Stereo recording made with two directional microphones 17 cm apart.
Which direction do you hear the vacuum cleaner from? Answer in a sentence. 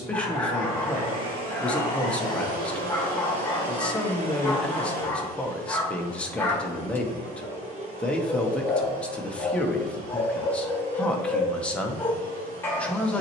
You can hear the vacuum cleaner on the right.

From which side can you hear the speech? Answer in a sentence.
You can hear the speech in the centre.